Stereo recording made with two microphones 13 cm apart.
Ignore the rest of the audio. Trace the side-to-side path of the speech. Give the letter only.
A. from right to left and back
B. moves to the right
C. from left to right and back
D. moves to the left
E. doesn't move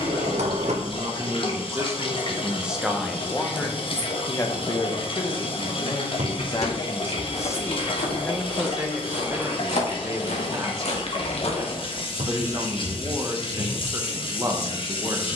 A.